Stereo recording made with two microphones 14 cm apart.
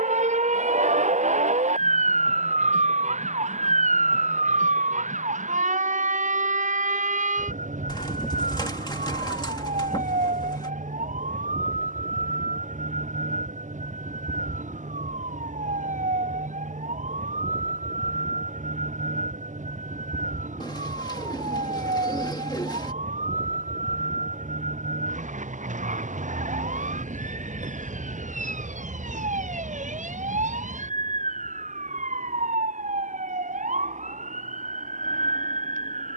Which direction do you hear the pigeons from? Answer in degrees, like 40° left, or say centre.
30° left.